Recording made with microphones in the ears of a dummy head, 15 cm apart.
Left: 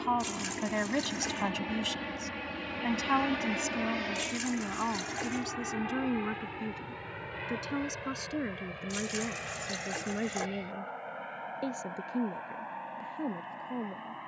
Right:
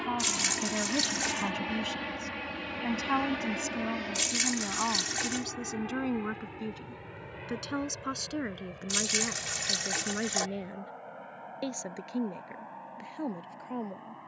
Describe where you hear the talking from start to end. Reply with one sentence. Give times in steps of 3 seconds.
You can hear the talking on the left from 0 s, in the centre from 3 s and on the right from 6 s.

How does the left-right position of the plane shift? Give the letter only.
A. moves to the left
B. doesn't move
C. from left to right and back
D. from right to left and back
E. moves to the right
A.